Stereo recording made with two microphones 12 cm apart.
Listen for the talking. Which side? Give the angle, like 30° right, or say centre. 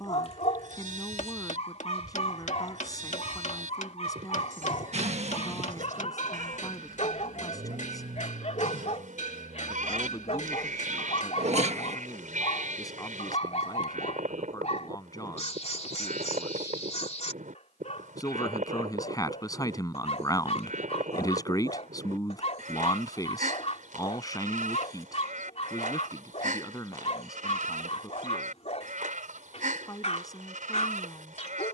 30° left.